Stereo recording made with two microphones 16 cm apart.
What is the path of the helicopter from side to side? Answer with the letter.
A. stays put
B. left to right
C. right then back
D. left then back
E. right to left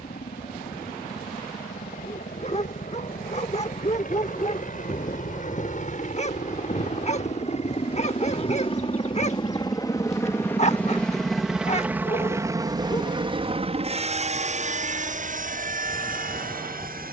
B.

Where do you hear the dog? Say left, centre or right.
left.